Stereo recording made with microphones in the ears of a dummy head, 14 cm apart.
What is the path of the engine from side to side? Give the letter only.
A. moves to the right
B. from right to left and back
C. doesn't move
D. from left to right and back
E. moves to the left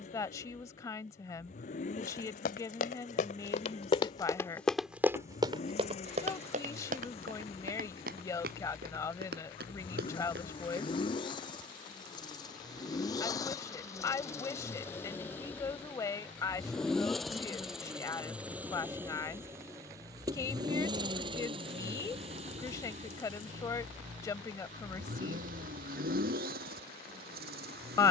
A.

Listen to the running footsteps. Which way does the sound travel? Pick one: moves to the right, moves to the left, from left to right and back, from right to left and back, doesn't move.
moves to the right.